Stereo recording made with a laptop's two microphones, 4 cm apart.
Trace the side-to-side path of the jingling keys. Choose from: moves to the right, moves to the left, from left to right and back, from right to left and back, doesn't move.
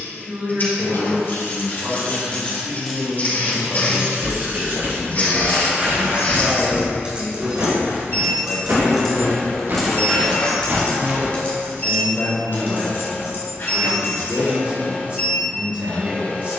from left to right and back.